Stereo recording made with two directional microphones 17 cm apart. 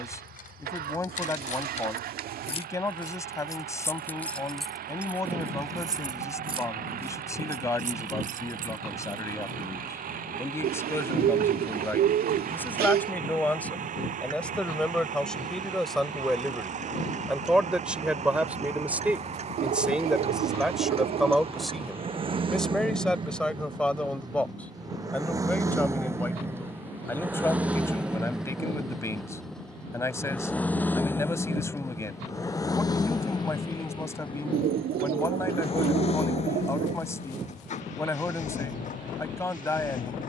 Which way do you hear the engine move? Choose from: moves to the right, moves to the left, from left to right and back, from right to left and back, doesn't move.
moves to the left.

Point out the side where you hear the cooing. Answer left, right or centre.
right.